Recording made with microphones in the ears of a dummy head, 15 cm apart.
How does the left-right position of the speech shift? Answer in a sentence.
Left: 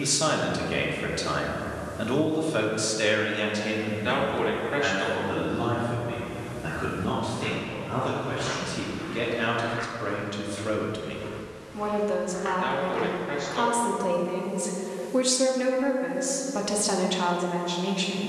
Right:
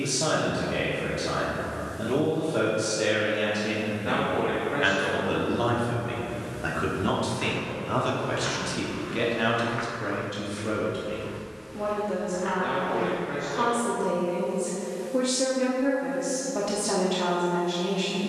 In this clip you hear the speech go right and come back.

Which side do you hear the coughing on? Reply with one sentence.
You can hear the coughing on the left.